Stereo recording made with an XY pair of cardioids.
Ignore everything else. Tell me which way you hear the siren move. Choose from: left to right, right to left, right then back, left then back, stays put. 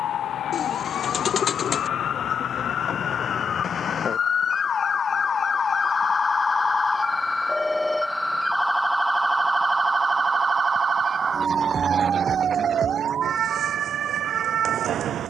left to right.